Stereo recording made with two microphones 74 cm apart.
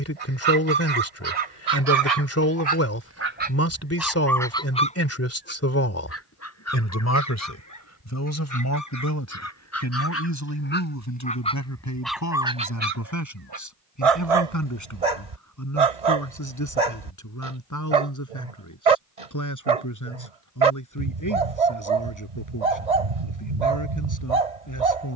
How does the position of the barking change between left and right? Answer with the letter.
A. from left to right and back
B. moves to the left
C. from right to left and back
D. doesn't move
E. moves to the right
C.